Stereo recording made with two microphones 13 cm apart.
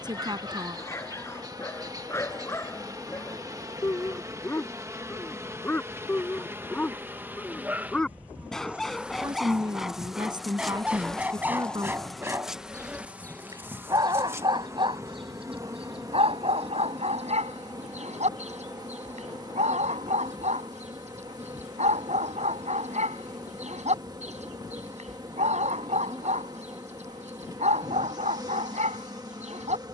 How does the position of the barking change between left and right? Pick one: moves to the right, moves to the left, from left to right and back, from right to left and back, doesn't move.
moves to the right.